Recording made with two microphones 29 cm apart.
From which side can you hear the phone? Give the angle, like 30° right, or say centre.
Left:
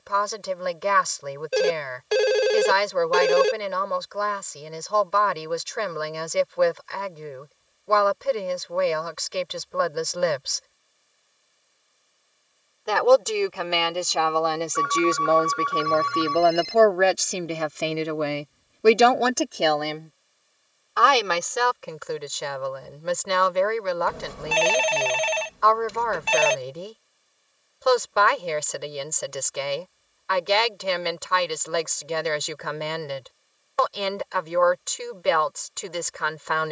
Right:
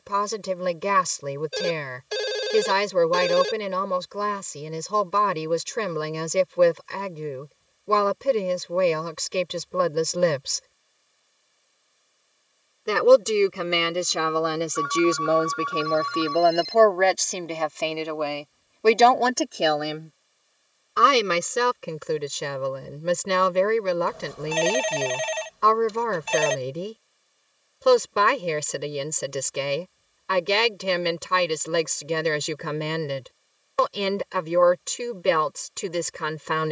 70° left.